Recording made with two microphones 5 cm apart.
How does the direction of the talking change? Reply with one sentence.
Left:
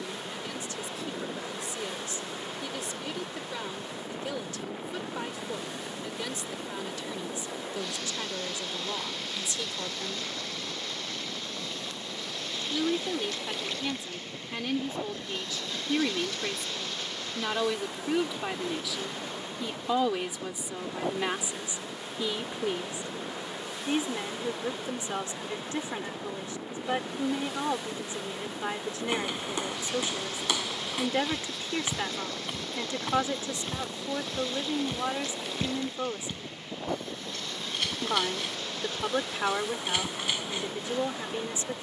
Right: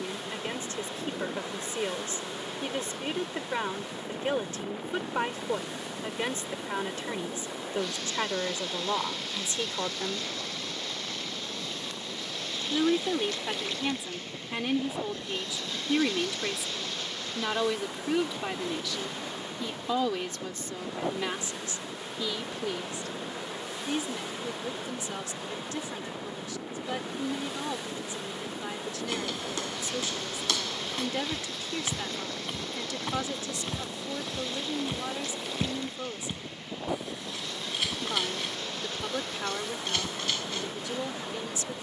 You can hear the talking go from the right side to the left.